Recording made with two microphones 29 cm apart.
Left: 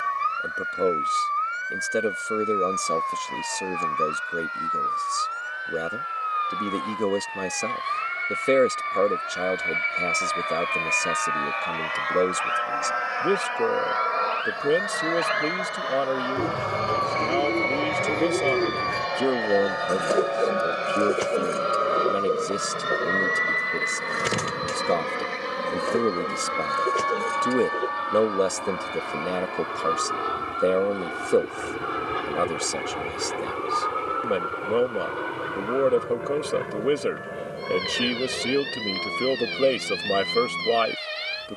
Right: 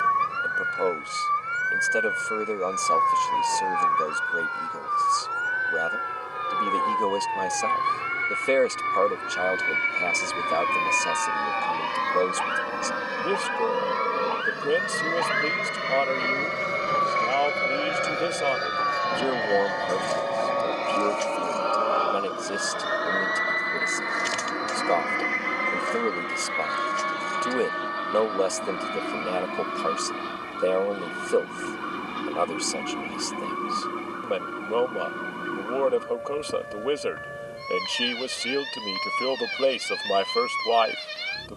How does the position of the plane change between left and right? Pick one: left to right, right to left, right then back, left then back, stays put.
right to left.